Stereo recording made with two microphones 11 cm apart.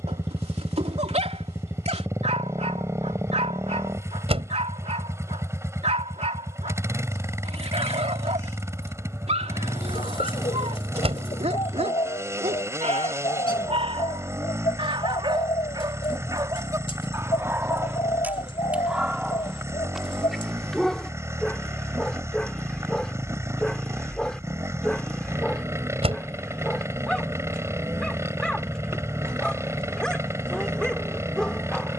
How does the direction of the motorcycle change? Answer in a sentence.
You can hear the motorcycle stay put.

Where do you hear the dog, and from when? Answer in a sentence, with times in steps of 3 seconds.
In this clip you hear the dog on the right from 0 s and in the centre from 18 s.